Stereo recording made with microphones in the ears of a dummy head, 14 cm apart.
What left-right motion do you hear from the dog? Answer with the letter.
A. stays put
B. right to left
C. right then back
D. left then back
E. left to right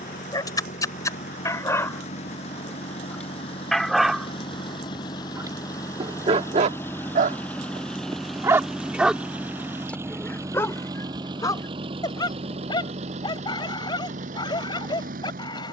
C.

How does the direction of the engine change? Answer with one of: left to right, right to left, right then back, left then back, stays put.
left to right.